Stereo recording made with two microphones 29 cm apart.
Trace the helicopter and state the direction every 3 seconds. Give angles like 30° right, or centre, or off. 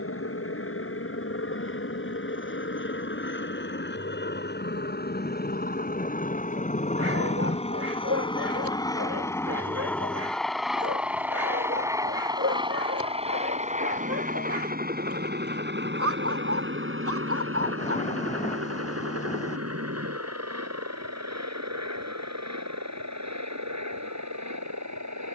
50° left, 40° left, 20° left, centre, 20° right, 40° right, 50° right, 60° right, 70° right.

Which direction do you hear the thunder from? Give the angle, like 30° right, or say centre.
20° left.